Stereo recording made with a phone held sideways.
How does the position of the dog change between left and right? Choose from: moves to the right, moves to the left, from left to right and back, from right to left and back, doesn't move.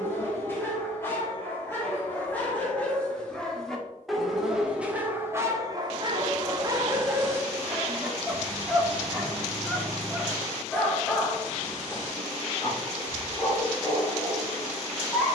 from left to right and back.